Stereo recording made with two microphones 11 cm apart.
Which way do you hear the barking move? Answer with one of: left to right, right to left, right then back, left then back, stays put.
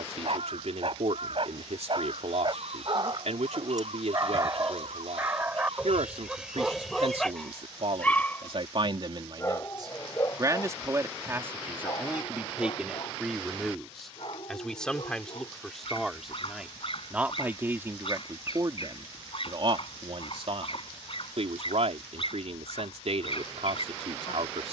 right to left.